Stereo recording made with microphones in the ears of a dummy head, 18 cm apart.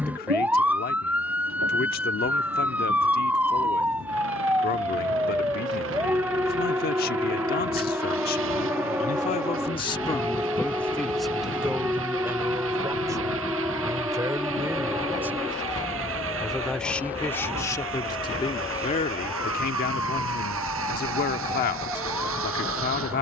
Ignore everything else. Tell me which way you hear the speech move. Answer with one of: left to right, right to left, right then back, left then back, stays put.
right then back.